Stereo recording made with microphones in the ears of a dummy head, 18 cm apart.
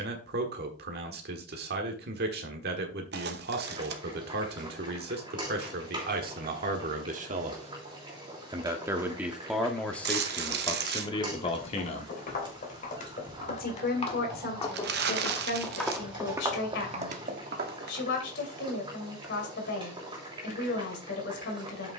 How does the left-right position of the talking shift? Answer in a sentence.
You can hear the talking move to the left.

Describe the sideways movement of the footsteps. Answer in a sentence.
You can hear the footsteps move from left to right.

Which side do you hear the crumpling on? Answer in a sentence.
You can hear the crumpling on the right.